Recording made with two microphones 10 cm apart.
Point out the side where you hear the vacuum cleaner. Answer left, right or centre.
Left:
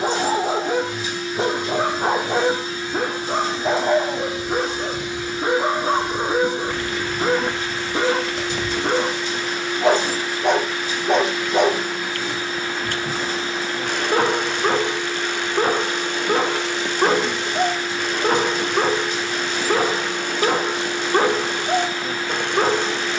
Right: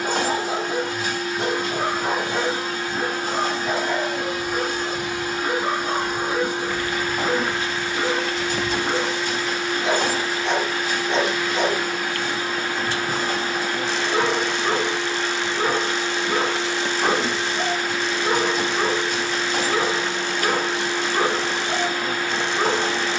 right.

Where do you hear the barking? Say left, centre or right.
left.